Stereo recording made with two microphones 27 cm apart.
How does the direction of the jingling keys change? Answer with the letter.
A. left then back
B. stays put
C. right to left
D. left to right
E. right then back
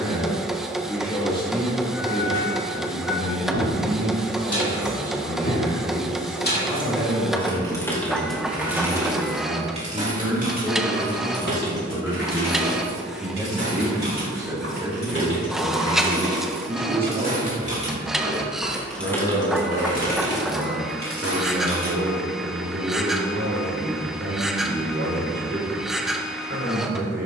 E.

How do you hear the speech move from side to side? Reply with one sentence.
You can hear the speech move to the right.